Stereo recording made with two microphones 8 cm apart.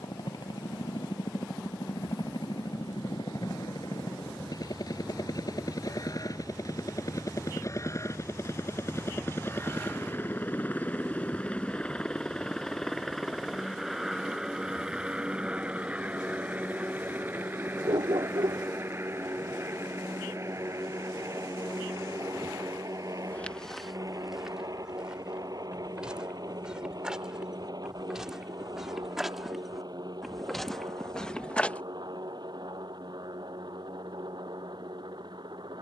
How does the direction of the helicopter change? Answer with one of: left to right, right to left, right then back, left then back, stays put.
left to right.